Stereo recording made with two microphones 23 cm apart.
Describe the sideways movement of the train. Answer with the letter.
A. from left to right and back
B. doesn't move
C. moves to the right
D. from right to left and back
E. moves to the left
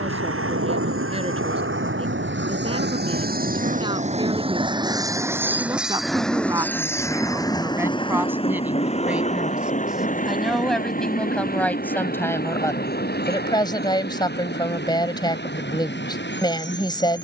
E.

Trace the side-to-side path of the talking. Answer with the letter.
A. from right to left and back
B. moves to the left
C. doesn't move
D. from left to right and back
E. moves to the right
B.